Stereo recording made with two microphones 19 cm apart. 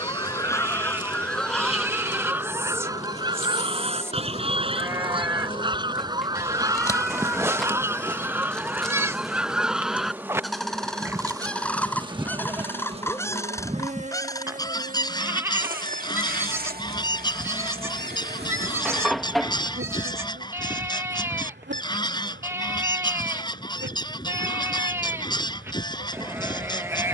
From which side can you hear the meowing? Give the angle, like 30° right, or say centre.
centre.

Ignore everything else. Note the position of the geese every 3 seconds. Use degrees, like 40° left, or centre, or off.
centre, 30° right, 10° right, centre, 20° left, 20° left, 20° left, 20° left, 20° left.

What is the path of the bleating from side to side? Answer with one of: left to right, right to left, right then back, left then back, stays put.
stays put.